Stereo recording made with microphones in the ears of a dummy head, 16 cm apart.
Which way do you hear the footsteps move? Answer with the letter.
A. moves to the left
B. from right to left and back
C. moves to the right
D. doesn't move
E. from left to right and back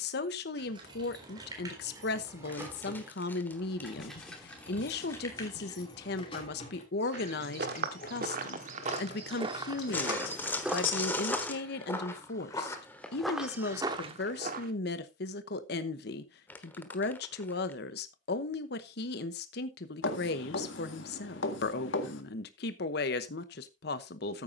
B.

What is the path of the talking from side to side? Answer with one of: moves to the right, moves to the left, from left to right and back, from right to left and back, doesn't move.
doesn't move.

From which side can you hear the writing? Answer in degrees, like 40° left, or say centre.
70° left.